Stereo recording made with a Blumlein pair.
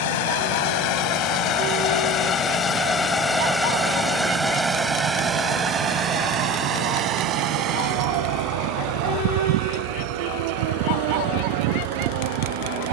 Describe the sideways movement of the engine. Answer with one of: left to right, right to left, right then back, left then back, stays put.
left to right.